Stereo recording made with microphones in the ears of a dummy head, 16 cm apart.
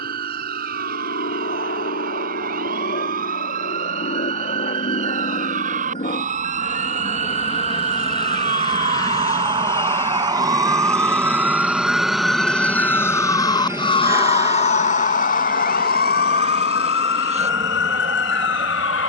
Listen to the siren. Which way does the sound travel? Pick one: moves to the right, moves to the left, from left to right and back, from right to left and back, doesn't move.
moves to the left.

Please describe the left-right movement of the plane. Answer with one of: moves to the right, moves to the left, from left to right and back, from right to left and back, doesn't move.
moves to the right.